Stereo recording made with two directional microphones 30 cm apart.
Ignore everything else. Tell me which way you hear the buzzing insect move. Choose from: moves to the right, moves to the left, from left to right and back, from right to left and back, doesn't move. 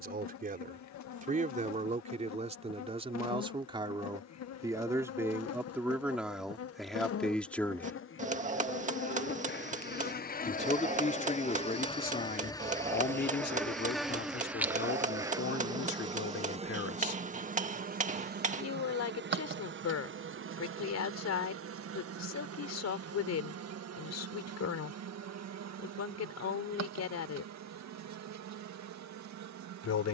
moves to the right.